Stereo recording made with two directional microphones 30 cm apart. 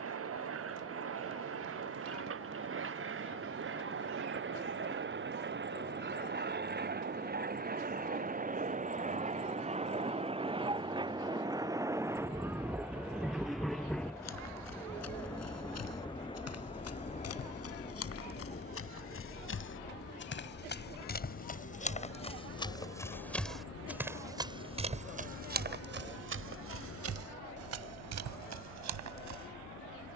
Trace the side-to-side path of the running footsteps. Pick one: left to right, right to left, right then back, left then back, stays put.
left to right.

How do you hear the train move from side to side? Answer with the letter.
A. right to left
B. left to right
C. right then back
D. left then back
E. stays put
A.